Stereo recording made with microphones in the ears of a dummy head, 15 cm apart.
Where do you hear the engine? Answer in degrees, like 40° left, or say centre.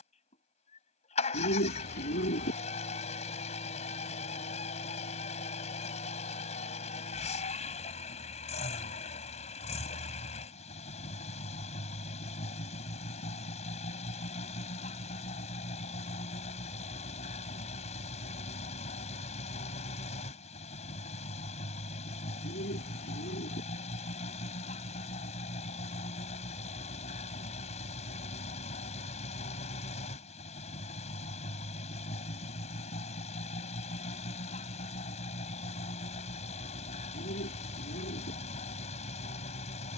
40° left.